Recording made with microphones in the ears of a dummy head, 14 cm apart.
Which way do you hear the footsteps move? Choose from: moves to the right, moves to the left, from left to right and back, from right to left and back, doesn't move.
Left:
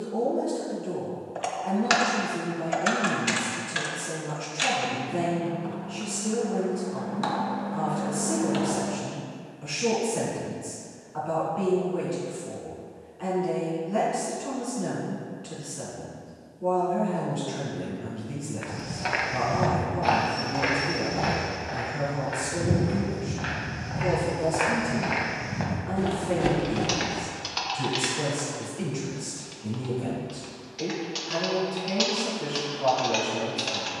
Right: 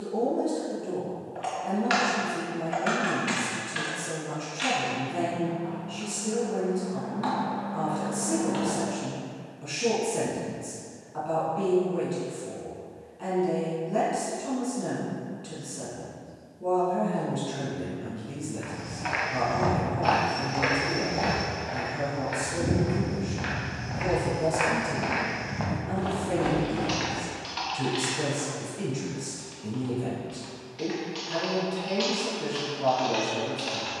from left to right and back.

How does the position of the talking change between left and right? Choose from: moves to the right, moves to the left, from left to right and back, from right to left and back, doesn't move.
doesn't move.